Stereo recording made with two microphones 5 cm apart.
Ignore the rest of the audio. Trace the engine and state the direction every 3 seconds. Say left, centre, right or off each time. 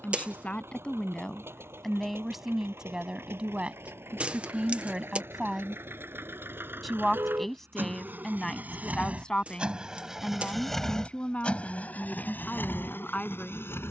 right, right, right, centre, left.